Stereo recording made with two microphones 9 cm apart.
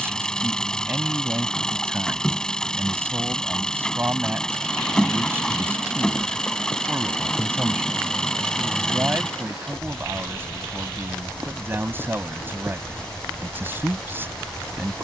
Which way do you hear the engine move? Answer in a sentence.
You can hear the engine stay put.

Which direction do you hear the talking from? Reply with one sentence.
In this clip you hear the talking on the right.